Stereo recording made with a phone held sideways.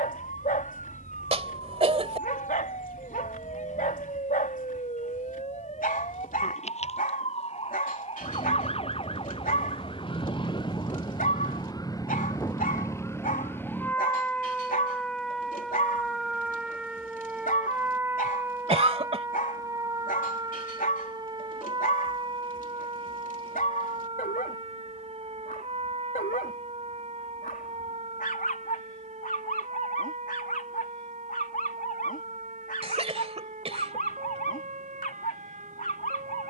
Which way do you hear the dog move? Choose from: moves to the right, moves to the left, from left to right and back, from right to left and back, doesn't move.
doesn't move.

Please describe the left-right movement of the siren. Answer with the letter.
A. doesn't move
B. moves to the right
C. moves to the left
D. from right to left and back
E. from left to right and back
B.